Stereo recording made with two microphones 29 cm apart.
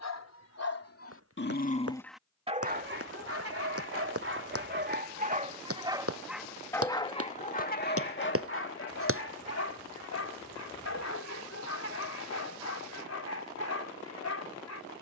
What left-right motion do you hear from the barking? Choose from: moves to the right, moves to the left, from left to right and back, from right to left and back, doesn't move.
from left to right and back.